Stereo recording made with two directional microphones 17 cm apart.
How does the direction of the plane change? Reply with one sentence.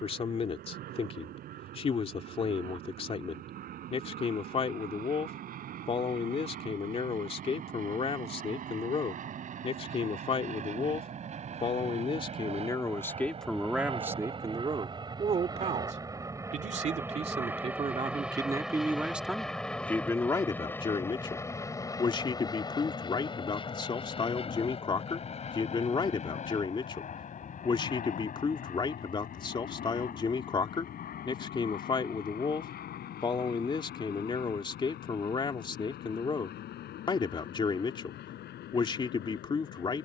You can hear the plane move from right to left.